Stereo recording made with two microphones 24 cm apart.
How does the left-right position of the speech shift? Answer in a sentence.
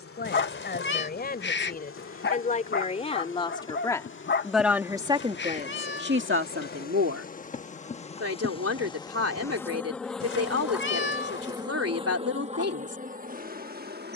In this clip you hear the speech go from the left side to the right.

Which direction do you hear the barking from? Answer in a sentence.
In this clip you hear the barking on the left.